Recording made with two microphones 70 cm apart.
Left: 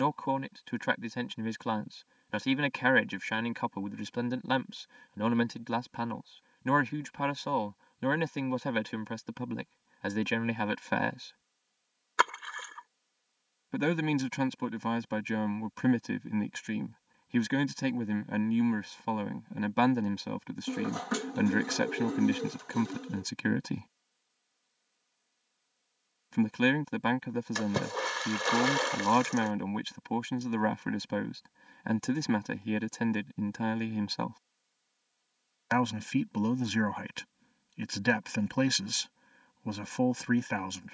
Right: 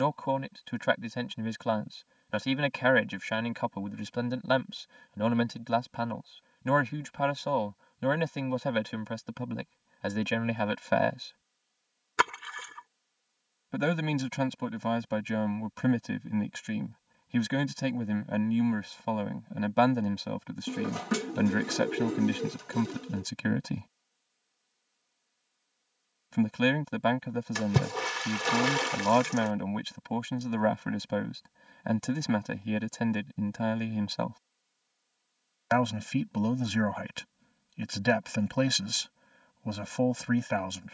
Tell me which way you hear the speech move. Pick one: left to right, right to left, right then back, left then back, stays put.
stays put.